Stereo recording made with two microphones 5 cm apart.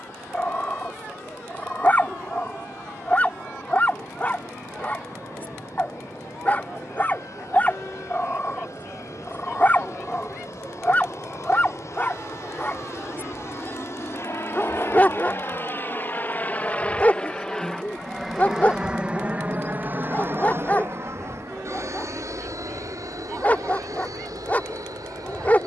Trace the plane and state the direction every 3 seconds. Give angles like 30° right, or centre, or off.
80° left, 80° left, 70° left, 70° left, 60° left, 30° left, 20° right, 60° right, 70° right.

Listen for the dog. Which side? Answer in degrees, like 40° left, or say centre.
30° left.